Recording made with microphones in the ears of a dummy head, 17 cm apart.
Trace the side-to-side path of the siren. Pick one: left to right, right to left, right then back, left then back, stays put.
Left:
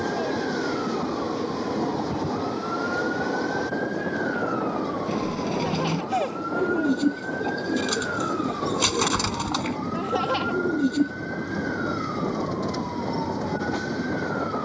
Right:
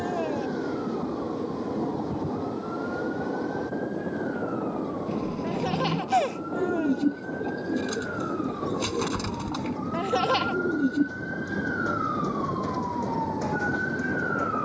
left to right.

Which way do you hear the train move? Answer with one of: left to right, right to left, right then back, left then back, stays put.
stays put.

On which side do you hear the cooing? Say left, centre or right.
left.